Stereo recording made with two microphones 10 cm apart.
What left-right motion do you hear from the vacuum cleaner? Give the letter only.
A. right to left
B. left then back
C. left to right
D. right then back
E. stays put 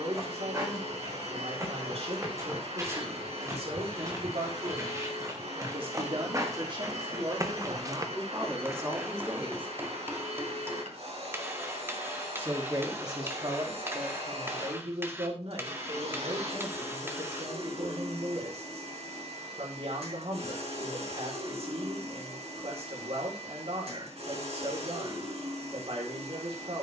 E.